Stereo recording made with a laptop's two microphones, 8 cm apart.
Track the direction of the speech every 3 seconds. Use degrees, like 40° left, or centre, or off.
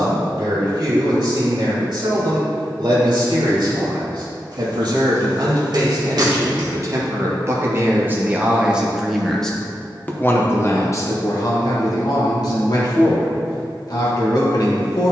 60° right, 60° right, 30° right, 30° left, 60° left.